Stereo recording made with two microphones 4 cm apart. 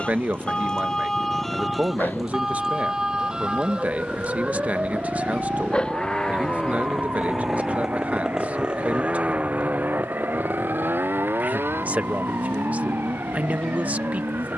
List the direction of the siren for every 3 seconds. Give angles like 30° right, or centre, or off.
centre, 30° right, 40° right, 50° right, 60° right.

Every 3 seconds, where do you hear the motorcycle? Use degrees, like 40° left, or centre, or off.
50° left, 30° left, centre, 50° right, 70° right.